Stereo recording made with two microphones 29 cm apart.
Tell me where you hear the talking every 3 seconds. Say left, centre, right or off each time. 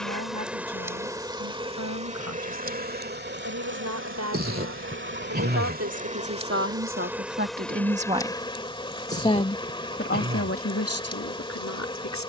right, right, right, left.